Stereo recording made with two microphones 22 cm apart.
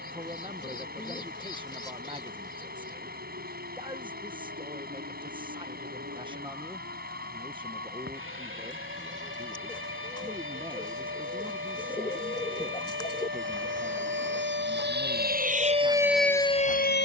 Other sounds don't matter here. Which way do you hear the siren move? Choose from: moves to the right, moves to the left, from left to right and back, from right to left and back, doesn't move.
moves to the left.